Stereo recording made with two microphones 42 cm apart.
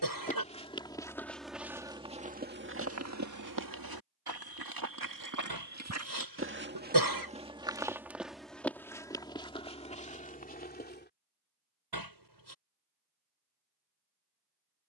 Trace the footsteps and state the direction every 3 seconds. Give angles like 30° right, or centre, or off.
centre, 50° right, 10° right, 20° left, off.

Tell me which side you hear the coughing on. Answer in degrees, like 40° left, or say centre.
60° right.